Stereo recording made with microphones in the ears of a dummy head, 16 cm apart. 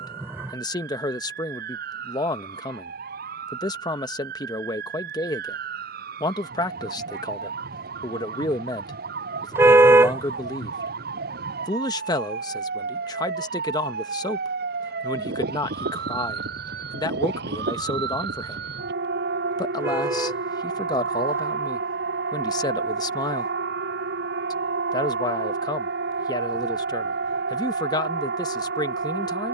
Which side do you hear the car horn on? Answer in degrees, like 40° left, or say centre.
10° right.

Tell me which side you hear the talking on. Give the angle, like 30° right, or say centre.
20° left.